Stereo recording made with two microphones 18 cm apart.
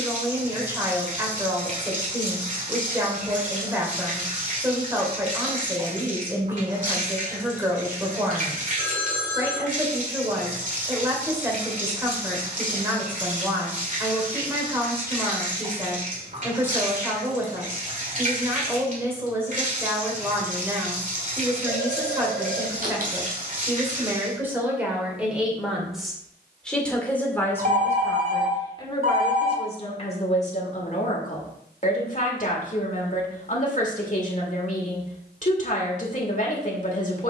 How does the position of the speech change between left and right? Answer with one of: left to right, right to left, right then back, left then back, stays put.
right to left.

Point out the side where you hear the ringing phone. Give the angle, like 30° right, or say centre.
60° right.